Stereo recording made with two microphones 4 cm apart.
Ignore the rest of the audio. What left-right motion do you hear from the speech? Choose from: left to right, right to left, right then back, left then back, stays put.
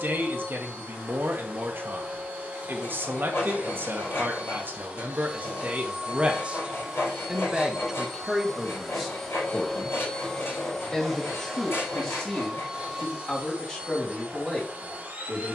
right to left.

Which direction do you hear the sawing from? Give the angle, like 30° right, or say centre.
70° left.